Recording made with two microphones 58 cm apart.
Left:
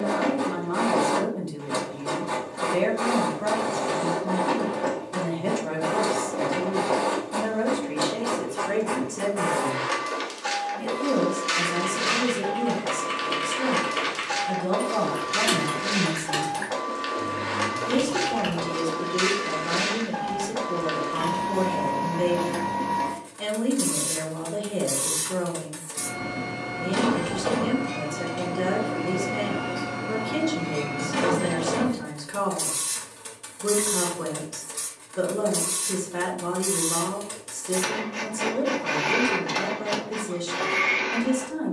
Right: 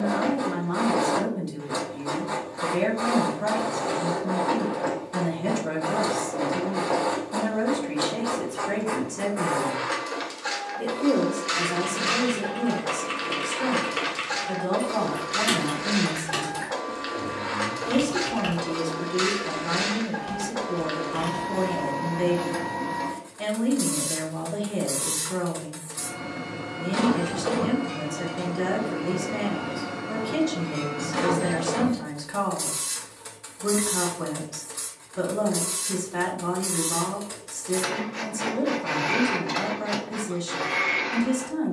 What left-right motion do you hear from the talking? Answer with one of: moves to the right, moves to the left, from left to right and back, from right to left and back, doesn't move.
from right to left and back.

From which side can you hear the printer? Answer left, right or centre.
left.